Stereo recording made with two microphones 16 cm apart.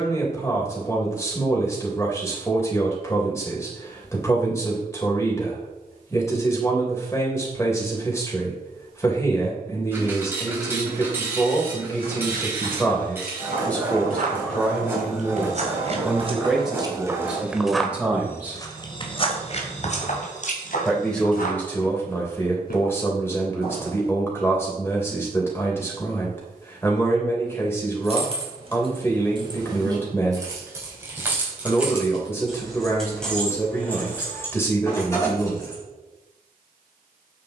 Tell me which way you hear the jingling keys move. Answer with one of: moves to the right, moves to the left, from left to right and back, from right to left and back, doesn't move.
moves to the left.